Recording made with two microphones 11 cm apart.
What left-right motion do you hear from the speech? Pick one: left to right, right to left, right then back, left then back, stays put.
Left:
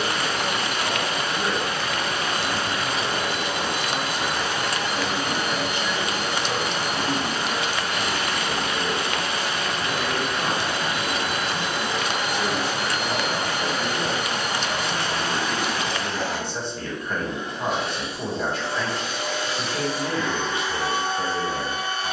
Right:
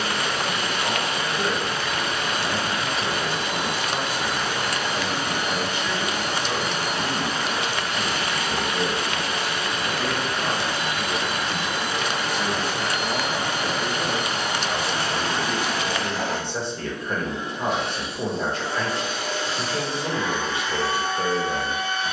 left then back.